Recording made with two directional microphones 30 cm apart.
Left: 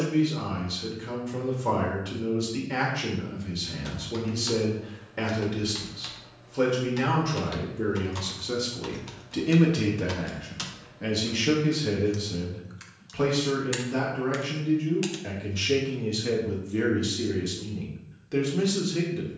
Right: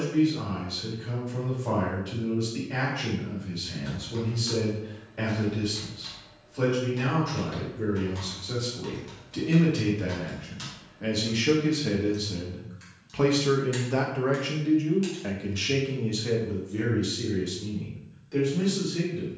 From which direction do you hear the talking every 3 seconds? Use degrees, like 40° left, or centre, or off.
40° left, 40° left, 40° left, 10° left, 20° right, 10° left, 40° left.